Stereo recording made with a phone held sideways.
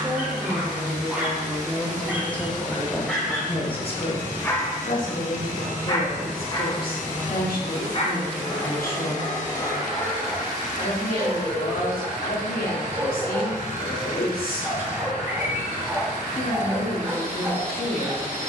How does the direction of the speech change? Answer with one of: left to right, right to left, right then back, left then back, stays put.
right to left.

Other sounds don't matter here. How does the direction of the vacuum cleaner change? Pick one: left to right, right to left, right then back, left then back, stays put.
stays put.